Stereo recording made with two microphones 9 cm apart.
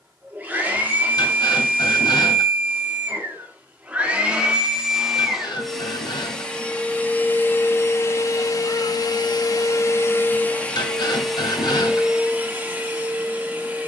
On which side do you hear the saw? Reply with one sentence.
You can hear the saw on the left.